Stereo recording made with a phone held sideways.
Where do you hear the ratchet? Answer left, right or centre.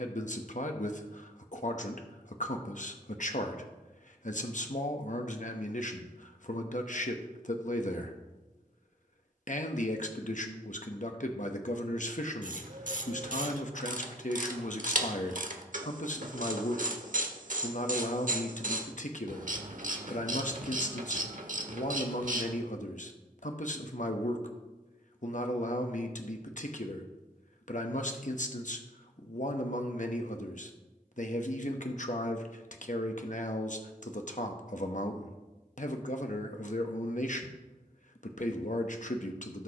right.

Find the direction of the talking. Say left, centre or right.
left.